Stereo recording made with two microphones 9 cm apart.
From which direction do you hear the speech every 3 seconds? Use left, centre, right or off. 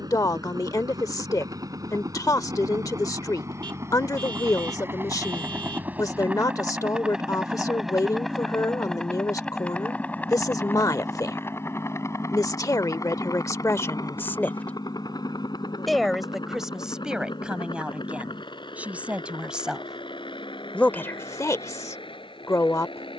left, left, left, left, left, centre, centre, left.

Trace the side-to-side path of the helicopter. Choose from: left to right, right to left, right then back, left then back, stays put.
right to left.